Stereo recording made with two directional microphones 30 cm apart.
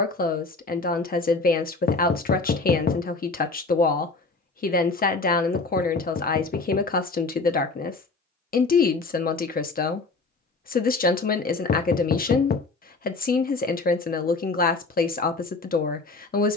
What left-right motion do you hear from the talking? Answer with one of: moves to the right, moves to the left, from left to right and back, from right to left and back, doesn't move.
doesn't move.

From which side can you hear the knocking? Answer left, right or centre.
left.